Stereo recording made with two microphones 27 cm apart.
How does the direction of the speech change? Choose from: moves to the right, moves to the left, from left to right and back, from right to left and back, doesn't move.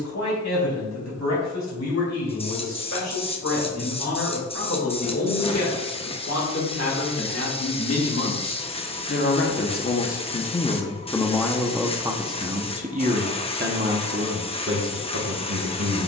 moves to the right.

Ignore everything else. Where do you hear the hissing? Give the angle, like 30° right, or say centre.
20° left.